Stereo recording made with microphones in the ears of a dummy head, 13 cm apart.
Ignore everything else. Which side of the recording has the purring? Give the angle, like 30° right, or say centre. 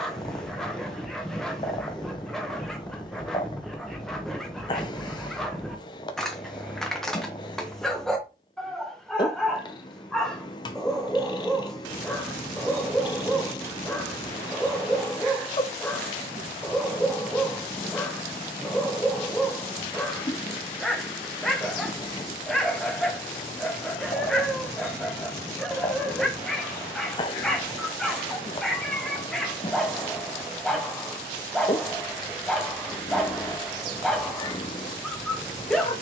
30° left.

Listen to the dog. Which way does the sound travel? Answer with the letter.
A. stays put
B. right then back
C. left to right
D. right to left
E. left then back
A.